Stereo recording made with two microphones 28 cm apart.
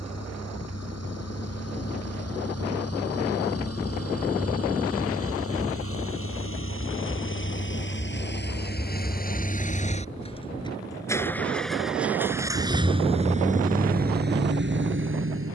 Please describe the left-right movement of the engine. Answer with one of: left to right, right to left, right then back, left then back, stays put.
left to right.